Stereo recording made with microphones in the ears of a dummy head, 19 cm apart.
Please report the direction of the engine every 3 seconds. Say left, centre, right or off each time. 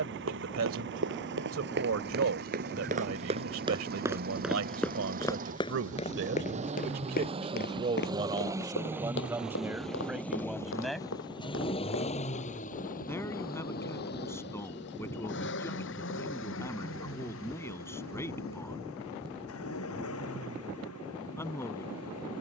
right, right, right, centre, left, left, left, left.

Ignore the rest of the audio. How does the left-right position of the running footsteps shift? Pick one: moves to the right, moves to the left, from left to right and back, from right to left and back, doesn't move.
moves to the left.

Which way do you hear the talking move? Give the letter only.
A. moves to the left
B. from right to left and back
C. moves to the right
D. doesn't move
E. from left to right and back
A.